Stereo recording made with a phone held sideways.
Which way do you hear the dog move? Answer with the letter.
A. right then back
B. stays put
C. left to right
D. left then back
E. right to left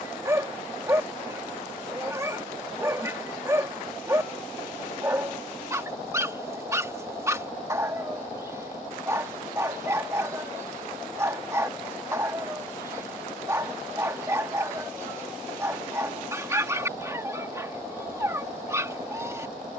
B.